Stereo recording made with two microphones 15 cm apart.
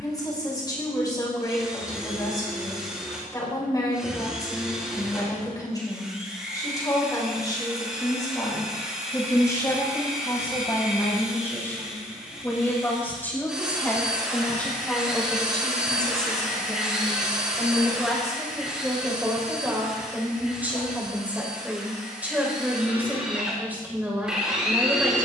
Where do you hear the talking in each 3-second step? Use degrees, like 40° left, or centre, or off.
30° left, 30° left, 30° left, 20° left, 10° left, centre, 10° right, 10° right, 10° right.